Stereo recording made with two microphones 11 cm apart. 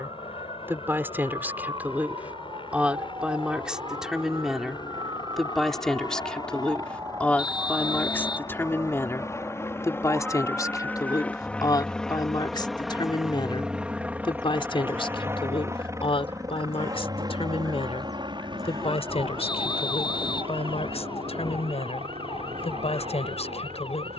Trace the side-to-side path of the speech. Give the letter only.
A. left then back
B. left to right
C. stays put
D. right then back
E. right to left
E.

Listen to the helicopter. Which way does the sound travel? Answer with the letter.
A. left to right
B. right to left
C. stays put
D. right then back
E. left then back
A.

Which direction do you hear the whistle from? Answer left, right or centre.
left.